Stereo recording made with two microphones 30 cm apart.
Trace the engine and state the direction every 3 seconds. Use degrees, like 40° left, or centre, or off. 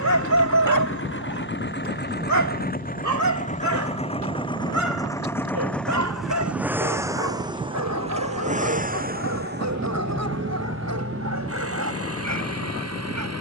40° left, 20° left, 10° right, 40° right, 50° right.